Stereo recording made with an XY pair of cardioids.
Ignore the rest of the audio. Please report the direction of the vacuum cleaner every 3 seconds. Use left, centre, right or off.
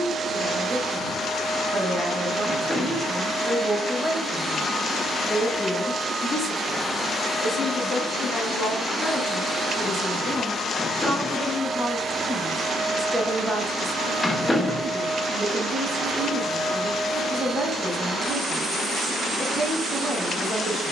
right, centre, centre, right, right, right, right.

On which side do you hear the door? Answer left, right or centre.
centre.